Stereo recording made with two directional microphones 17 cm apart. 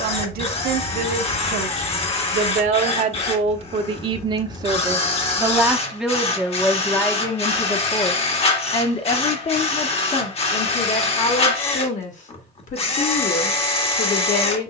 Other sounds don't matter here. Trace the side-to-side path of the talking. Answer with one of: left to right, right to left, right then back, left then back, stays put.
right to left.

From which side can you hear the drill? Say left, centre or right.
left.